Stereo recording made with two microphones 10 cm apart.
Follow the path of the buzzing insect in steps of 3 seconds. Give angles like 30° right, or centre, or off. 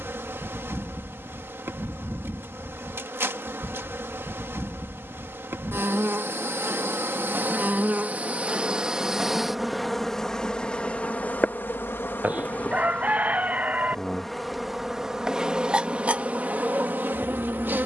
20° right, 20° right, 20° right, 10° left, 10° left, 20° right.